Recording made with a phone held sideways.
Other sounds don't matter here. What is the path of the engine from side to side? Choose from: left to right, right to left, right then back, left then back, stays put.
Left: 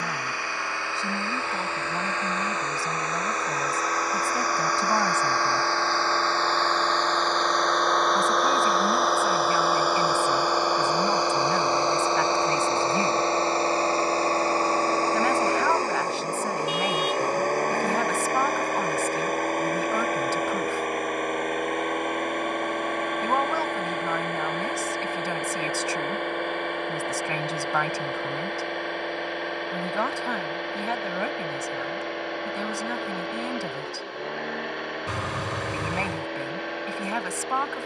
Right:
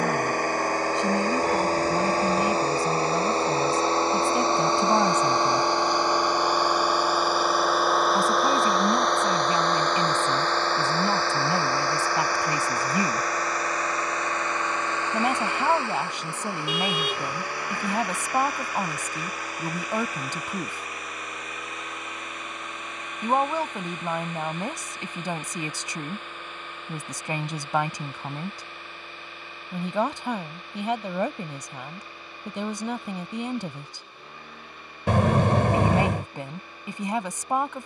right to left.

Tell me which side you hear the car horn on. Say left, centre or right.
right.